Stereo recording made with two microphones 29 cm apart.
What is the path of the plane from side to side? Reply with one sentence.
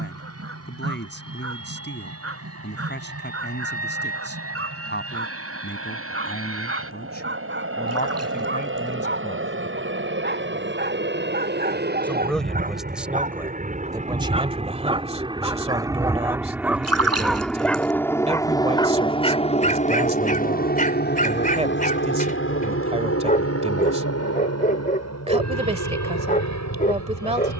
In this clip you hear the plane move from right to left.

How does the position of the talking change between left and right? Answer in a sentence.
In this clip you hear the talking travel towards the right.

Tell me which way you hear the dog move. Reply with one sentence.
You can hear the dog move to the left.